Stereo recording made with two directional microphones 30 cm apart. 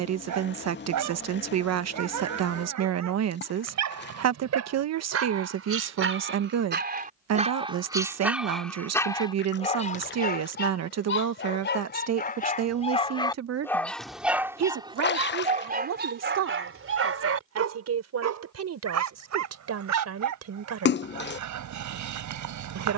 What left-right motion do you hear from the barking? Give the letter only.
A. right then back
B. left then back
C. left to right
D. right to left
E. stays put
B.